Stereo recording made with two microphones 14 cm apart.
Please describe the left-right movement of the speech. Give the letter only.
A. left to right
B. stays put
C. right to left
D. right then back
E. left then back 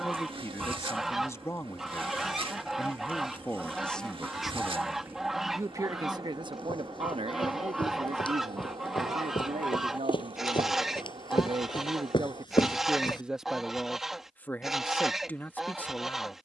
D.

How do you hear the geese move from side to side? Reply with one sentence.
In this clip you hear the geese stay in one place.